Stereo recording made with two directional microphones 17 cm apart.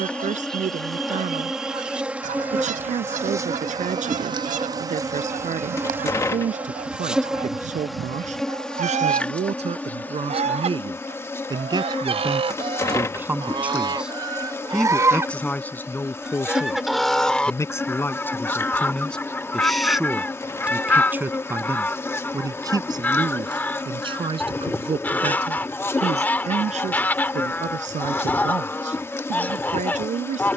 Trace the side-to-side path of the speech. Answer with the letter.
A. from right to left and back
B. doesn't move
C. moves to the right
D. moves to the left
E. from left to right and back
A.